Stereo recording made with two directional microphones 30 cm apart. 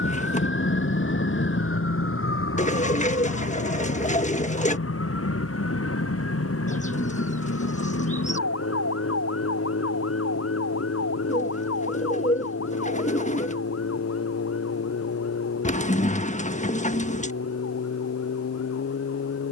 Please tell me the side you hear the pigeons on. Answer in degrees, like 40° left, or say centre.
20° left.